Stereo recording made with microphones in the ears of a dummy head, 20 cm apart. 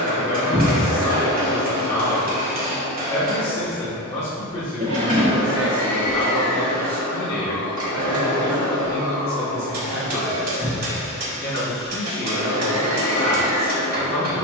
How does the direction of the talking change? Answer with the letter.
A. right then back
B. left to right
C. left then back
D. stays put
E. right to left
D.